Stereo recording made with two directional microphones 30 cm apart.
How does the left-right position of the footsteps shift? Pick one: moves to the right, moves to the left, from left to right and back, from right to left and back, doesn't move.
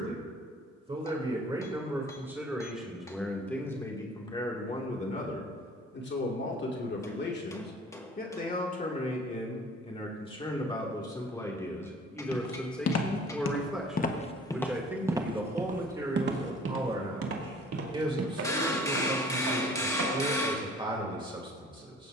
moves to the right.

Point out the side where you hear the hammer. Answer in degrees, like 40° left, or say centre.
10° left.